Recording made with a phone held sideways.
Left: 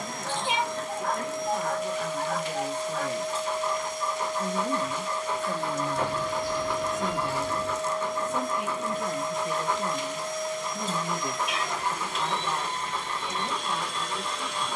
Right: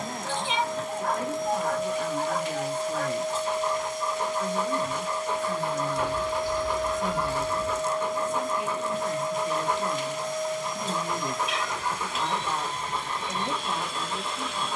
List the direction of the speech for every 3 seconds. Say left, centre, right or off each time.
centre, left, left, left, centre.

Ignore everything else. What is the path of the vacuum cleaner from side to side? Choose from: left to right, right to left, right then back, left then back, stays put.
stays put.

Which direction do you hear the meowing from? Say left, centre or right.
left.